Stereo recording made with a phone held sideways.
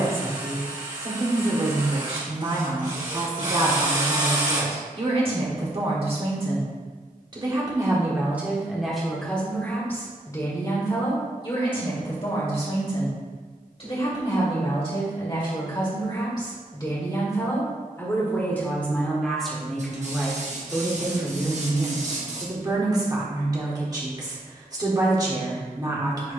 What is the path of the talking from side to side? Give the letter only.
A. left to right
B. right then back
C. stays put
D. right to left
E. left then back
E.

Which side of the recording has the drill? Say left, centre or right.
right.